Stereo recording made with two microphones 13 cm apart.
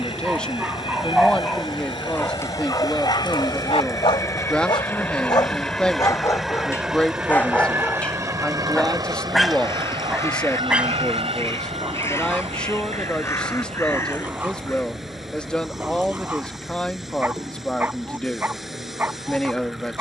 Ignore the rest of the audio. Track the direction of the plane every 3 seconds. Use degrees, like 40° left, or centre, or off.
40° left, 20° left, 10° right, 40° right, 60° right, 60° right, 70° right.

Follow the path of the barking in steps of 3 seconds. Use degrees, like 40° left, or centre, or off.
10° left, 40° left, 20° left, 10° right, 20° right, 20° right, 20° right.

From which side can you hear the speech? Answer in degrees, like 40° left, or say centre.
10° left.